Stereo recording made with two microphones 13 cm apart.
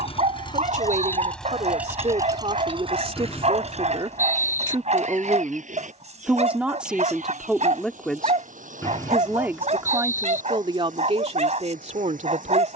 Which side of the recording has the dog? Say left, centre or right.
right.